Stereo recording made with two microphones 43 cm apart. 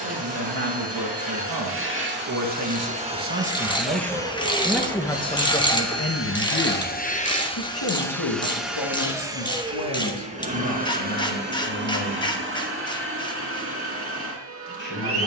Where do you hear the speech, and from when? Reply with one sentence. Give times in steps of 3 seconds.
You can hear the speech on the right from 0 s, in the centre from 3 s and on the left from 6 s.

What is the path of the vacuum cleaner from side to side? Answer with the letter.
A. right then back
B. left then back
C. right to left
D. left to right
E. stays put
B.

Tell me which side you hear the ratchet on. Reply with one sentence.
In this clip you hear the ratchet in the centre.